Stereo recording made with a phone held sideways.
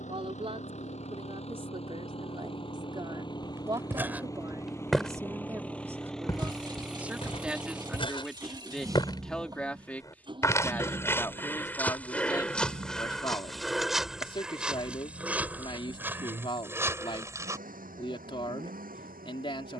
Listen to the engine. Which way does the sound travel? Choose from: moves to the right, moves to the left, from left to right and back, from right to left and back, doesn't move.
moves to the right.